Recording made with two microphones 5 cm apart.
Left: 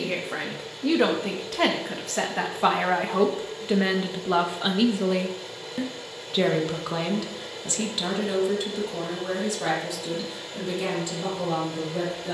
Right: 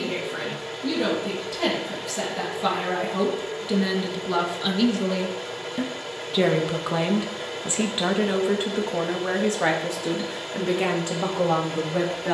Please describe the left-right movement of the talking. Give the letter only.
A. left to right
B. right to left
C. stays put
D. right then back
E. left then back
A.